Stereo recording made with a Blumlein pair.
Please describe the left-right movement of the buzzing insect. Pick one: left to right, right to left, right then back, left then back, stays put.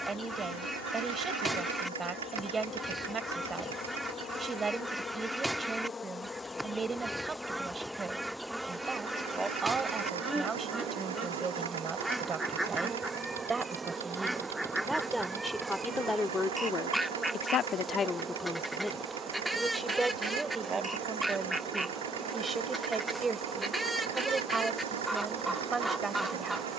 left to right.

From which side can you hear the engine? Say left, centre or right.
right.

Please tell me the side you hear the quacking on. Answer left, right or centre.
centre.